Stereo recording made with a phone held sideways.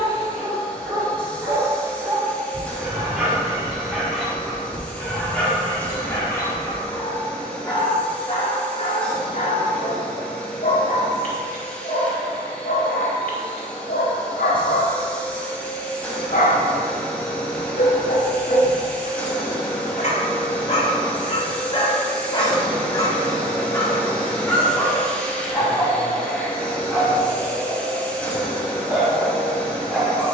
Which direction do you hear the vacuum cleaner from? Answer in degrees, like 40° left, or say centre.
10° left.